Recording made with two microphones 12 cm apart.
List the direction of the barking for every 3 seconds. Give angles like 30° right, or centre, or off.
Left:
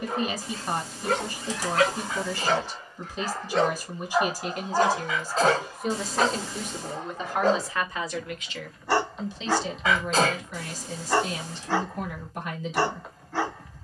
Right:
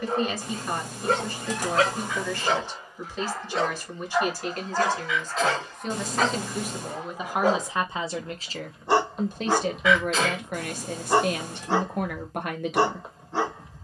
30° right, 10° left, 10° right, 30° right, 30° right.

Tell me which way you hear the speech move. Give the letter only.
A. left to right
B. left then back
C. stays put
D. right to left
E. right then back
A.